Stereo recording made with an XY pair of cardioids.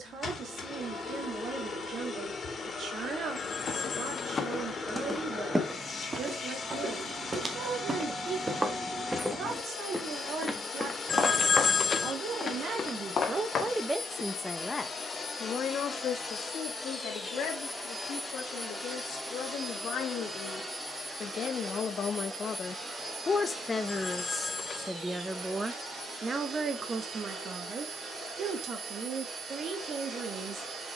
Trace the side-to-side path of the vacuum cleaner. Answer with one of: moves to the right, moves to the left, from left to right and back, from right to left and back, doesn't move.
moves to the right.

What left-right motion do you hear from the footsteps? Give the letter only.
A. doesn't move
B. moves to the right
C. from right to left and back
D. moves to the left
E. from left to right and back
E.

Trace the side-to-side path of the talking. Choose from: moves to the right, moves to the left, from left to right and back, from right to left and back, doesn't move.
from right to left and back.